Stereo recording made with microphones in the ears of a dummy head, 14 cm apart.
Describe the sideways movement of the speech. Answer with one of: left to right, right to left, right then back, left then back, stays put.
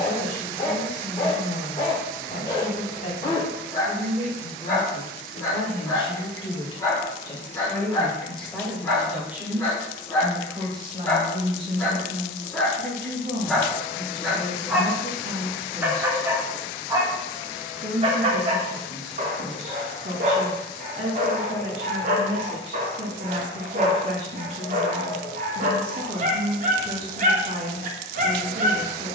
left to right.